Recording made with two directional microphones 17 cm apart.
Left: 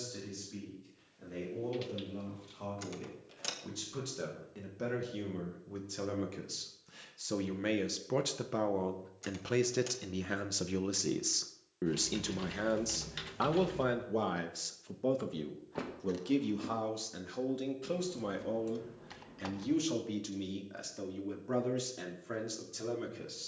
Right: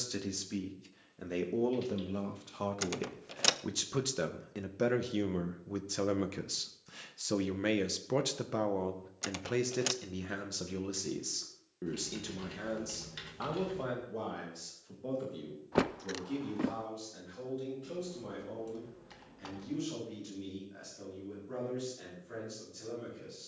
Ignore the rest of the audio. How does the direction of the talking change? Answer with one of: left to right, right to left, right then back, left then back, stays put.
right to left.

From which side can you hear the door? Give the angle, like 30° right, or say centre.
60° right.